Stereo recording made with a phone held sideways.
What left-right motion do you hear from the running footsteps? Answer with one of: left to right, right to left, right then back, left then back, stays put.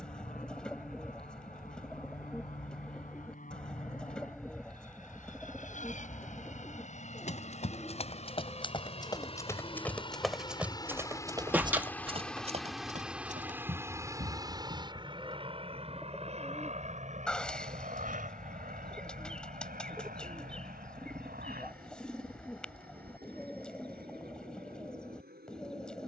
left to right.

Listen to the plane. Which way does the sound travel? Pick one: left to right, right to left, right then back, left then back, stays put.
left to right.